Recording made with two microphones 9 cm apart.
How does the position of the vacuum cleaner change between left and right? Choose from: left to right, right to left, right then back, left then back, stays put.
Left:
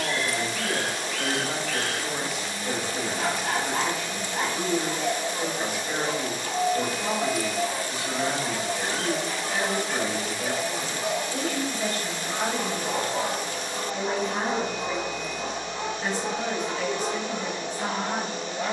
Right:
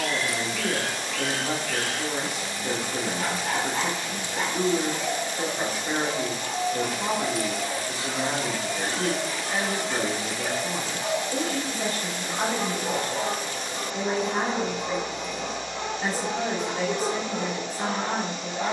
stays put.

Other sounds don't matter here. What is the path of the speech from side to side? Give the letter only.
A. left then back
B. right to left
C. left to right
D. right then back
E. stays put
E.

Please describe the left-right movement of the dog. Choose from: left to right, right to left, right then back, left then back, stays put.
left to right.